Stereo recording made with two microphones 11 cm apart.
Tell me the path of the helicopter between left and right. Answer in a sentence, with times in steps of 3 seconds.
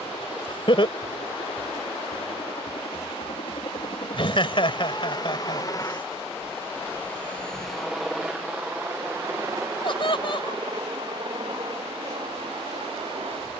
In this clip you hear the helicopter on the left from 0 s, in the centre from 6 s and on the right from 9 s.